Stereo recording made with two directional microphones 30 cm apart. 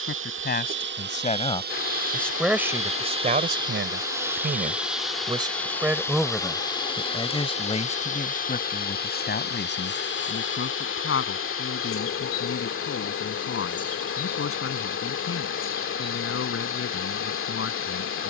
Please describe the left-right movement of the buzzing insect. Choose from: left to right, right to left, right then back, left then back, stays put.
right to left.